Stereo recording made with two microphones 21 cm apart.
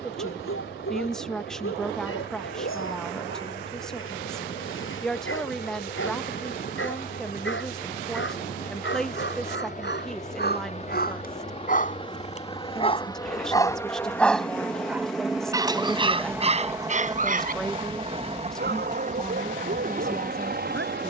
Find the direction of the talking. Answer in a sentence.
In this clip you hear the talking in the centre.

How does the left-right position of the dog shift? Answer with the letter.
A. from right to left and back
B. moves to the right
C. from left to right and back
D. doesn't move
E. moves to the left
B.